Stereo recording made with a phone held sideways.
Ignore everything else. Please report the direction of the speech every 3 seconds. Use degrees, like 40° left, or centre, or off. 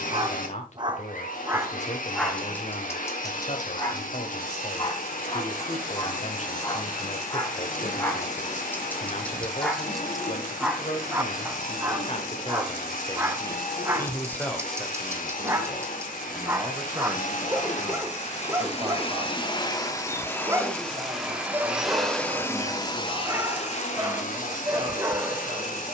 50° left, 50° left, 50° left, 50° left, 20° left, 10° right, 30° right, 30° right, 30° right.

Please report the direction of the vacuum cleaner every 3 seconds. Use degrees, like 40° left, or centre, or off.
60° left, 60° left, 60° left, 60° left, 60° left, 60° left, 30° left, 20° left, 60° left.